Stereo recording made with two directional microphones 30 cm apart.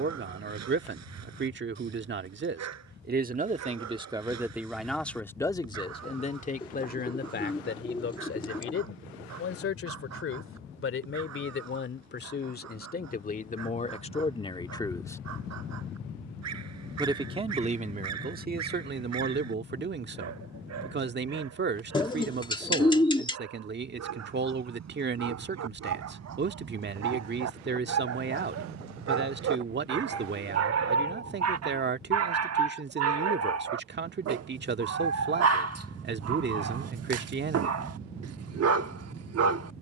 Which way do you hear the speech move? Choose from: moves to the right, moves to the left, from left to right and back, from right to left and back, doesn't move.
from right to left and back.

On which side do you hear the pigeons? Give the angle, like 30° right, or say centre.
20° left.